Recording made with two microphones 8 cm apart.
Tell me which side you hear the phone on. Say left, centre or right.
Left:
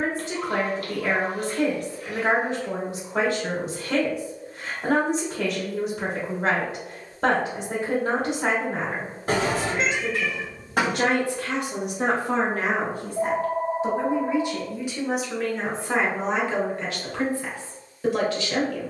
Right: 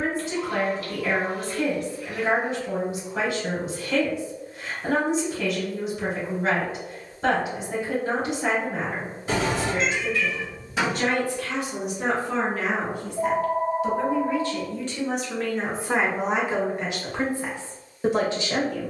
left.